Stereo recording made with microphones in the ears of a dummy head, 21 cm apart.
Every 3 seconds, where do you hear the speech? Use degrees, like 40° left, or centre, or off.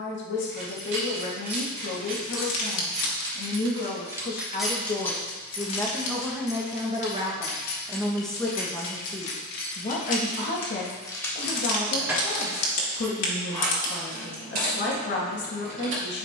50° left, 30° left, centre, 40° left, 50° left, 50° left.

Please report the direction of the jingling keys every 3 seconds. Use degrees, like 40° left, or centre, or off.
40° right, centre, 50° left, 30° left, 30° right, 50° right.